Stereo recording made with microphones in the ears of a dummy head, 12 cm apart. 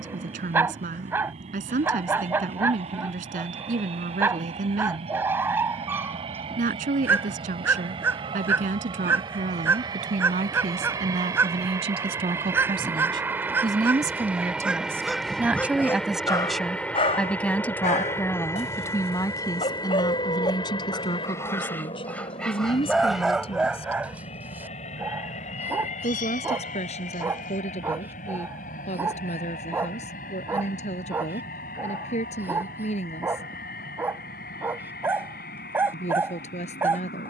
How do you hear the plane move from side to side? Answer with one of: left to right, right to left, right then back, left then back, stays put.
right to left.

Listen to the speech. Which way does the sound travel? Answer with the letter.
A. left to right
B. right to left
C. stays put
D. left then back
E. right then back
B.